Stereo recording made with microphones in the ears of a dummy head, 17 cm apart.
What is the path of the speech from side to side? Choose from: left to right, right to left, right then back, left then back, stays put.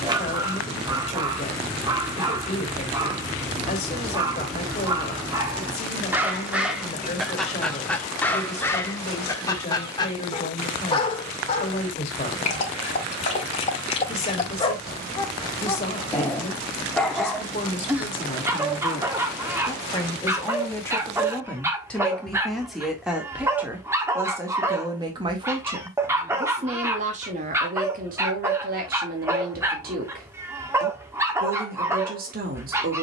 left to right.